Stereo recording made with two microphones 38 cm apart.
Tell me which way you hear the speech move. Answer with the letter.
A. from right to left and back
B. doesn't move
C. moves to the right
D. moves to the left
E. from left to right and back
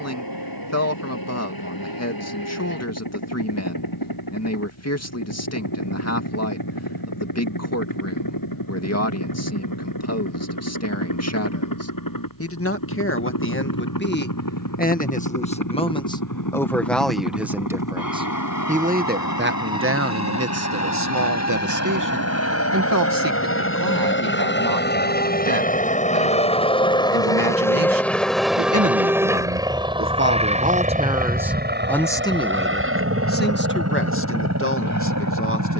E.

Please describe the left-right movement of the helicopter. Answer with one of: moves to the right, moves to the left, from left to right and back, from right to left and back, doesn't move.
moves to the right.